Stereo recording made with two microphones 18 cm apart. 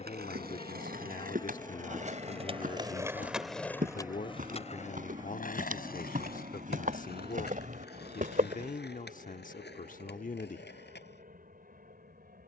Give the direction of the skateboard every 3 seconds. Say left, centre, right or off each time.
right, left, left, left.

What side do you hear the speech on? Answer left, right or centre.
left.